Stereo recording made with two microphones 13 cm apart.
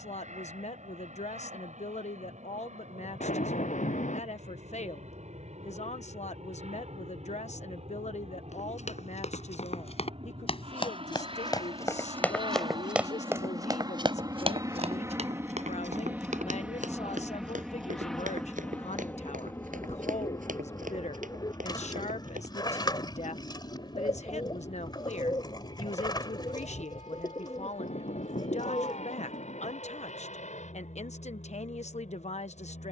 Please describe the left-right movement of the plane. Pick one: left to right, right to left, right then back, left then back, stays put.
right to left.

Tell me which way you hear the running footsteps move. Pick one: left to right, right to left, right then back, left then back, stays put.
left to right.